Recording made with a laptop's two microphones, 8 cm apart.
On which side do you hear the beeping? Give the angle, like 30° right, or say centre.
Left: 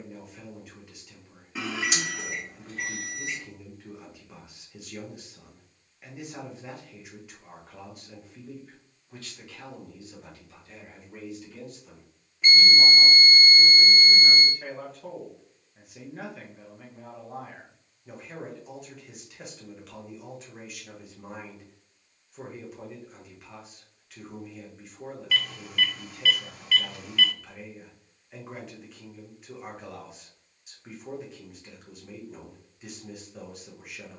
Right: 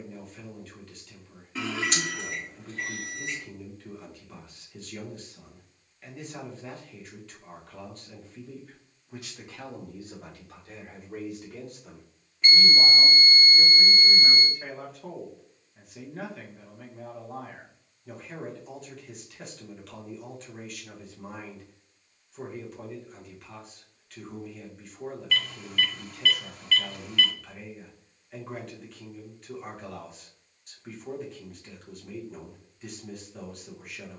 10° left.